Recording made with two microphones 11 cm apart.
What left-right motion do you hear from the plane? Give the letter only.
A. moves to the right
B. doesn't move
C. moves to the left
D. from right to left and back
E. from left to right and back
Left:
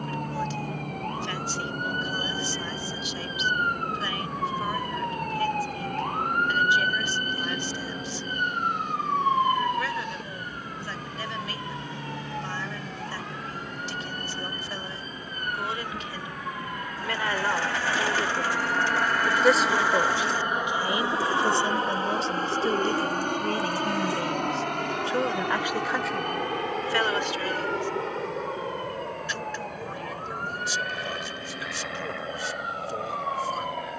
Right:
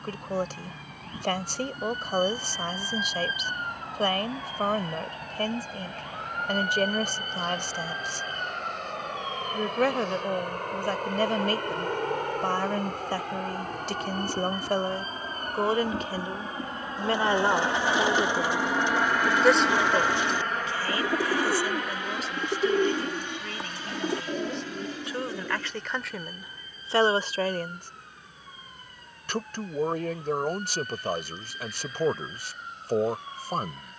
C.